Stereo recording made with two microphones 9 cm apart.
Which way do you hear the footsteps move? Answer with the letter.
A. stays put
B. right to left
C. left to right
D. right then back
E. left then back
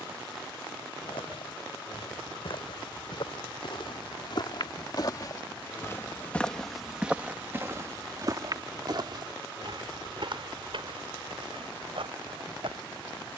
C.